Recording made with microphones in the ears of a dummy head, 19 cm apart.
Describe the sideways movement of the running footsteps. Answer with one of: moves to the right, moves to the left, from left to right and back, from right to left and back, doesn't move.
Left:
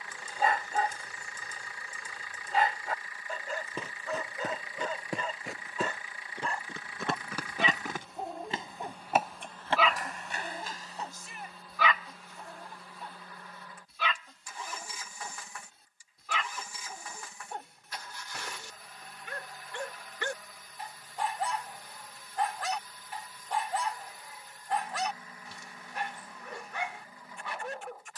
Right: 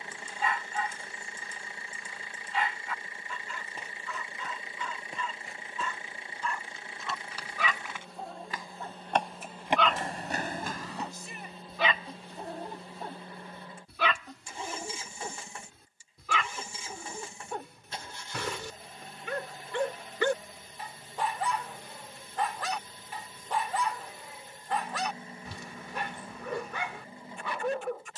moves to the right.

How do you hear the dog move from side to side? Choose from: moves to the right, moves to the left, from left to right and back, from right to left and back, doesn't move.
moves to the right.